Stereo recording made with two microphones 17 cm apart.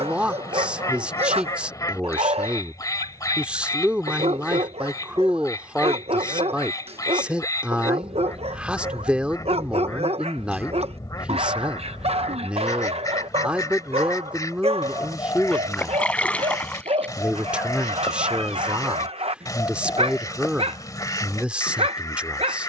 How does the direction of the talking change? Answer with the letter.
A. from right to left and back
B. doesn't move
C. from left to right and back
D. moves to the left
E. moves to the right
B.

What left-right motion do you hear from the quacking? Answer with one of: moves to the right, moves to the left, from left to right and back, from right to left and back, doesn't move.
doesn't move.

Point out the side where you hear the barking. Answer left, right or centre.
right.